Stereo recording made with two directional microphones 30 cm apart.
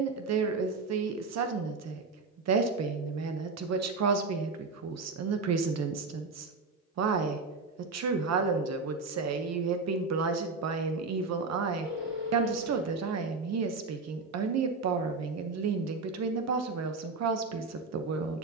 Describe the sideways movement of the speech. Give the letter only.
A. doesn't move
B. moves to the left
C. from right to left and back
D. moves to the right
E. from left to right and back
A.